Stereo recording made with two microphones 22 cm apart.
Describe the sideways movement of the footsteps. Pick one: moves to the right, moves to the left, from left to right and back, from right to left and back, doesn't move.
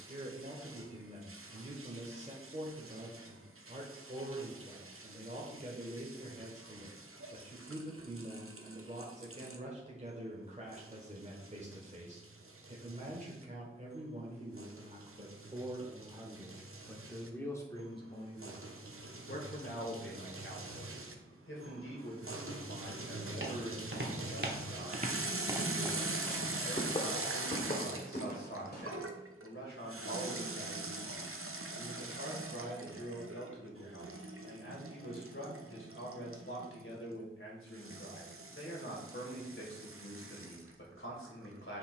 moves to the left.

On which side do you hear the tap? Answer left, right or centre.
right.